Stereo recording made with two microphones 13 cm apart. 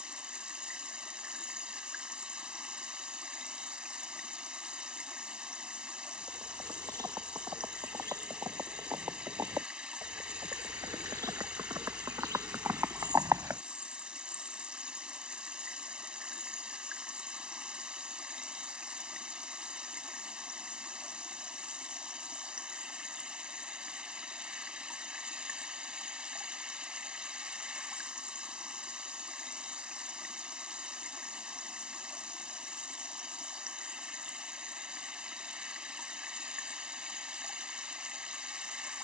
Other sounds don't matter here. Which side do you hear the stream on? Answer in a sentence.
You can hear the stream in the centre.